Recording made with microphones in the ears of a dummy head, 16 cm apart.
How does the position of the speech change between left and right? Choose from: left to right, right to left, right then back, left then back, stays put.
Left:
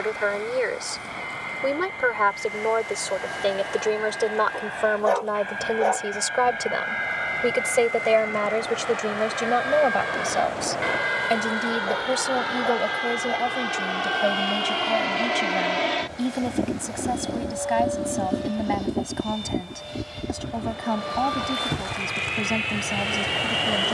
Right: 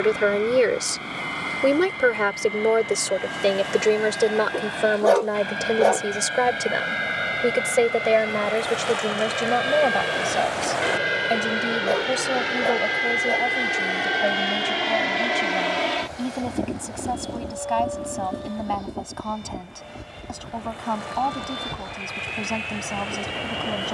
right to left.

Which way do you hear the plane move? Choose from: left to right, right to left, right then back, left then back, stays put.
right to left.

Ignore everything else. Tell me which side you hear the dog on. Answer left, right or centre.
right.